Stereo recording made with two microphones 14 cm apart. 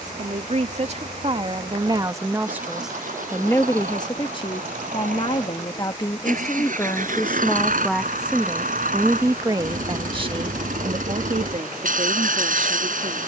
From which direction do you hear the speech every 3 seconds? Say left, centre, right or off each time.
right, left, centre, right, right.